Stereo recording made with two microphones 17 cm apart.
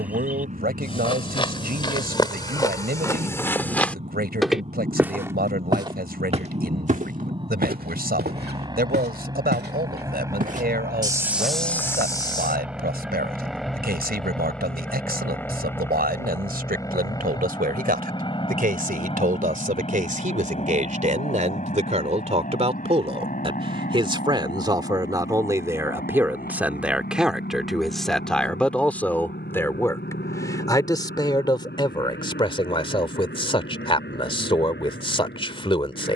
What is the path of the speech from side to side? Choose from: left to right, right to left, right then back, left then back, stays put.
right to left.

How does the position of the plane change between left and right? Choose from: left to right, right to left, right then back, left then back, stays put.
right to left.